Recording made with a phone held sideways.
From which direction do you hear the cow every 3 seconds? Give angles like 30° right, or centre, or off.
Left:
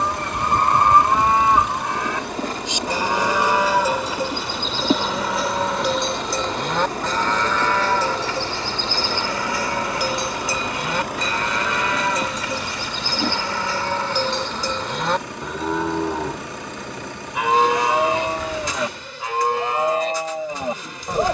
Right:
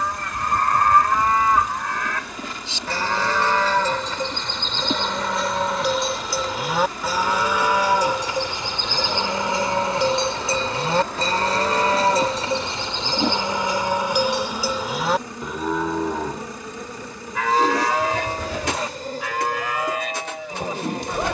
20° left, 10° left, 10° right, 30° right, 20° right, 10° left, 30° left.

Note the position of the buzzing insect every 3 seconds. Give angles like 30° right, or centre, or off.
40° left, 40° left, 40° left, 20° left, 10° right, 30° right, 40° right.